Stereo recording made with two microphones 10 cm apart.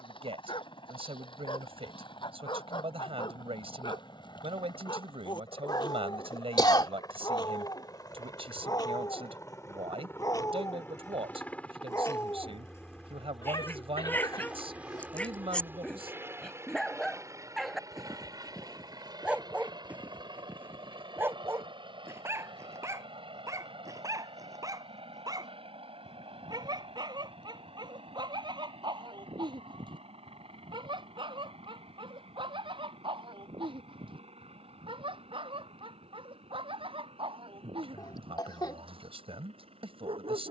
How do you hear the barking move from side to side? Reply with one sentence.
In this clip you hear the barking travel towards the right.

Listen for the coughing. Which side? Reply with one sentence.
You can hear the coughing on the left.